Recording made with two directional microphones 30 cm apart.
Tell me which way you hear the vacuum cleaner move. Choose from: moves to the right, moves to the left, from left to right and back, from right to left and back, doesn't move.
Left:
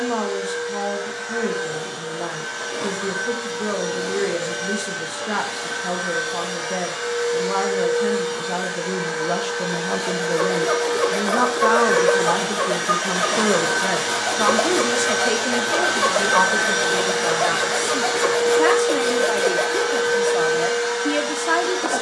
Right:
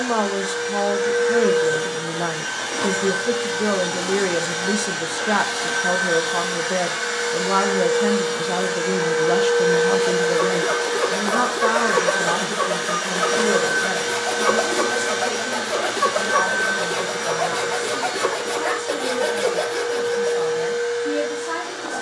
moves to the left.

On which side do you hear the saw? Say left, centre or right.
centre.